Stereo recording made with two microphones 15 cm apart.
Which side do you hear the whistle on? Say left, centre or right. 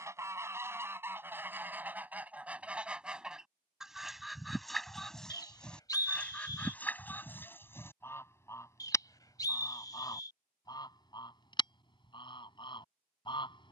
left.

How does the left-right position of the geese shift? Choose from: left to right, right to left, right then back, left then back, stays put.
right to left.